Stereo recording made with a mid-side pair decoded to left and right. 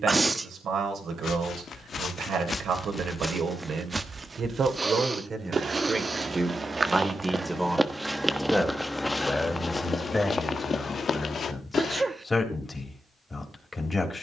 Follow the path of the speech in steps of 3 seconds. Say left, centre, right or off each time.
right, right, centre, left, left.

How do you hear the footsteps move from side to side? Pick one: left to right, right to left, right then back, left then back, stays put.
right then back.